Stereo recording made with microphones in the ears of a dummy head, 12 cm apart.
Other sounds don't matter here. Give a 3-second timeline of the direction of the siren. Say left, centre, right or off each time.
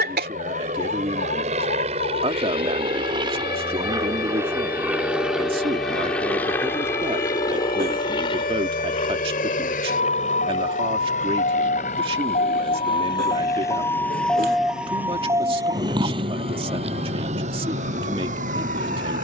left, left, left, left, left, right, right.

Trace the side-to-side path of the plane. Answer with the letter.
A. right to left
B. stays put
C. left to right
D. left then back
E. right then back
A.